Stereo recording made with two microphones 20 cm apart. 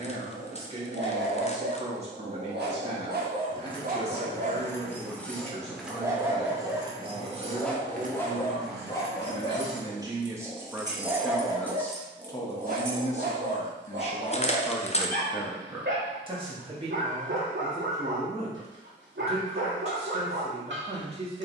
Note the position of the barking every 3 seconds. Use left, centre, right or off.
right, right, centre, centre, right, right, right.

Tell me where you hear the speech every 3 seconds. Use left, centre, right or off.
right, right, right, centre, left, right, right.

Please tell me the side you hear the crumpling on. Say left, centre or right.
left.